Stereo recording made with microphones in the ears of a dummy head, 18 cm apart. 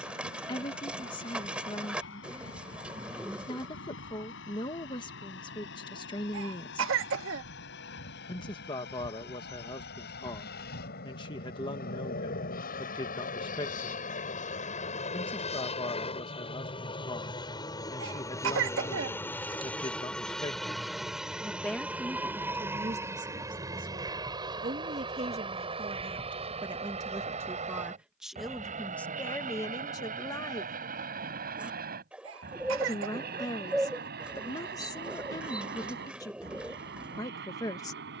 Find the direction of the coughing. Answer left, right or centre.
right.